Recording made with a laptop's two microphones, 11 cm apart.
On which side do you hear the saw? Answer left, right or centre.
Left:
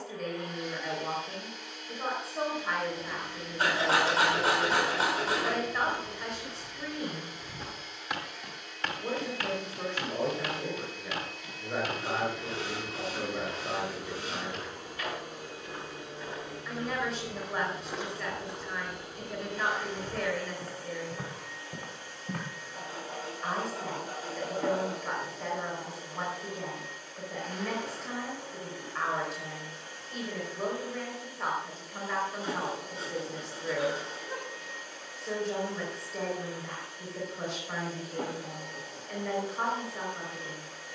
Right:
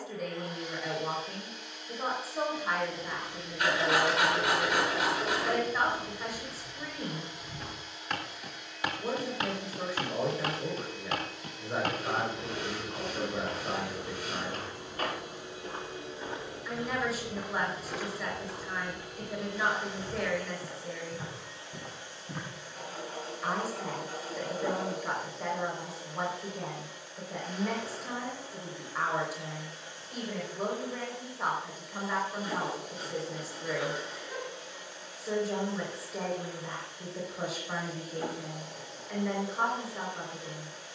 left.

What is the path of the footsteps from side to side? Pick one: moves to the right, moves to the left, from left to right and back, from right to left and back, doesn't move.
from left to right and back.